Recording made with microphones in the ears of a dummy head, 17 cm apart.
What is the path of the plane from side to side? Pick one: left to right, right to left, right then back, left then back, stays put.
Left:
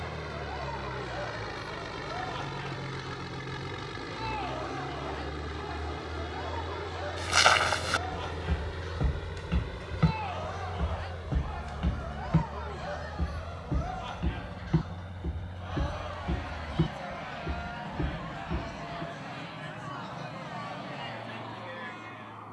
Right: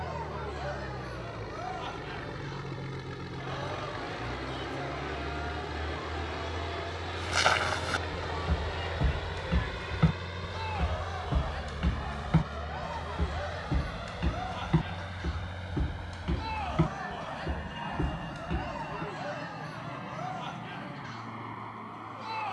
left to right.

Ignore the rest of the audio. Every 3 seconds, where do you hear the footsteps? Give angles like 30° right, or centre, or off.
off, off, 20° left, 10° right, 30° right, 50° right, 50° right, off.